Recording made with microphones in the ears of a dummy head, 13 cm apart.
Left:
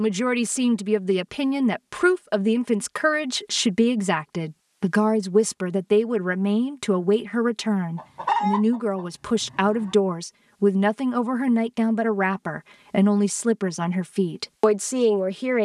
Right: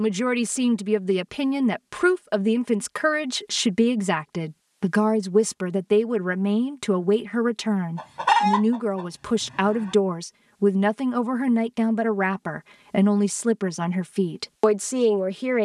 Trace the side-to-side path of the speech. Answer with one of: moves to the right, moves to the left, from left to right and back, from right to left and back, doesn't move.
doesn't move.